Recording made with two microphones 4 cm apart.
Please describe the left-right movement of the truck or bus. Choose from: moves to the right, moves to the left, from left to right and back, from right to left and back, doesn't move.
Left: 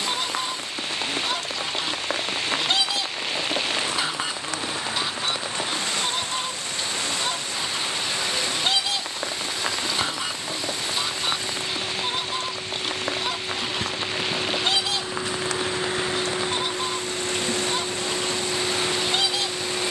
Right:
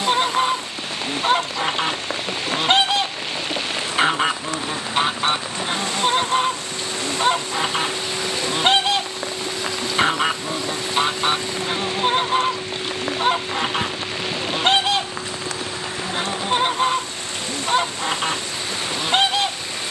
moves to the left.